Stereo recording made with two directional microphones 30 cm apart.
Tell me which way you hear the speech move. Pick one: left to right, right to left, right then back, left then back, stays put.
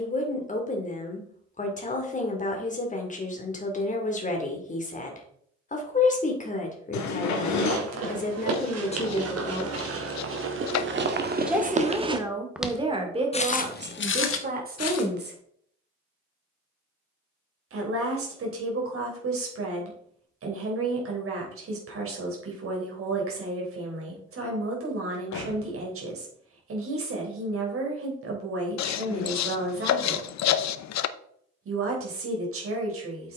left to right.